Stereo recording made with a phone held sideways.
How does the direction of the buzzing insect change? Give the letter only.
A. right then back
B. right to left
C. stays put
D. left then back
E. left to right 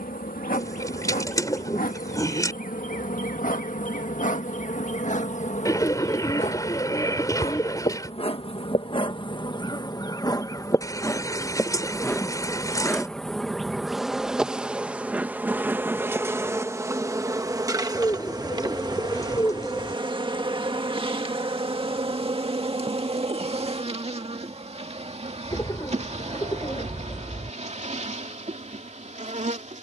E.